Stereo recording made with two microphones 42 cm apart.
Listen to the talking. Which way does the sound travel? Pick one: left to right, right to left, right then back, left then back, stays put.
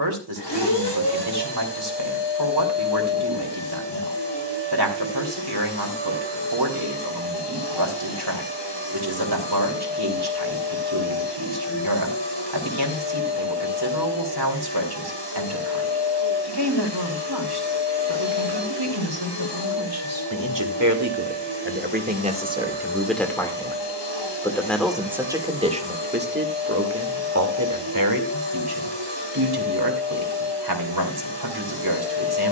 left then back.